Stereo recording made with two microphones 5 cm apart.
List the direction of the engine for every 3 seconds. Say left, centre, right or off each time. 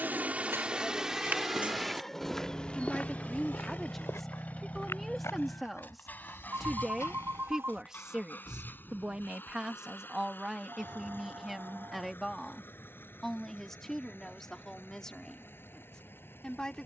centre, left, left, left, left, left.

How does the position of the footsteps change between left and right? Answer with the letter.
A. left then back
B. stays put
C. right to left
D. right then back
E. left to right
C.